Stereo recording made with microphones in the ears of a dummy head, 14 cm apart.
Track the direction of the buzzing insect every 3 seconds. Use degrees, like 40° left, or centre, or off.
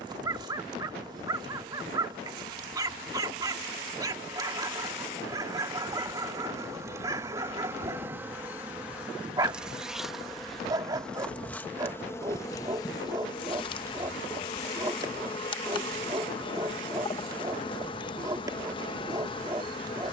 30° right, 30° right, 20° right, centre, 30° left, 30° left, 30° left.